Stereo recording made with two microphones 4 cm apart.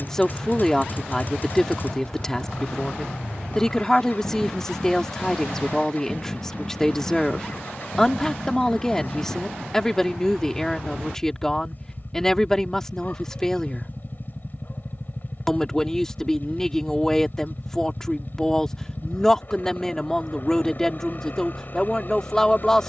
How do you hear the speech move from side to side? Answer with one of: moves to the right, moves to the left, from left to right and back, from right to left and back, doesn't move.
doesn't move.